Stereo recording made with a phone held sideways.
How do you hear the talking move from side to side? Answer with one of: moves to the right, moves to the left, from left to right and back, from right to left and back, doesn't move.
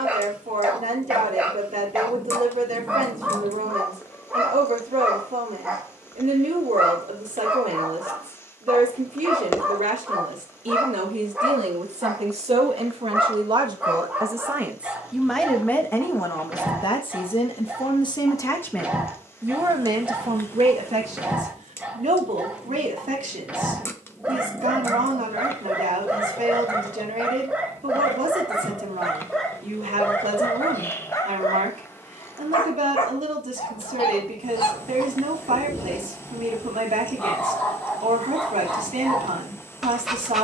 from right to left and back.